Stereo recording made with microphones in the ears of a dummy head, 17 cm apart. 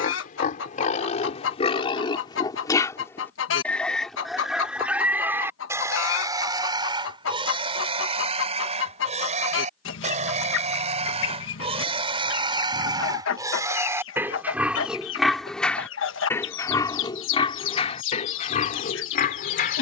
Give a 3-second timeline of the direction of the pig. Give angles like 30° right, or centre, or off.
30° left, centre, 30° right, 40° right, 20° right, 20° left, 50° left.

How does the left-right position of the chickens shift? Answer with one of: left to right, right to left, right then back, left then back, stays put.
stays put.